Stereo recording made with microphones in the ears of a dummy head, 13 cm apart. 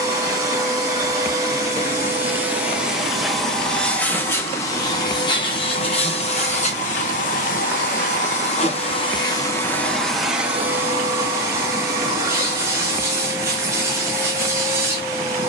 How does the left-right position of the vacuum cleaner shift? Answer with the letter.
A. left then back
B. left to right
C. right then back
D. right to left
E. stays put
A.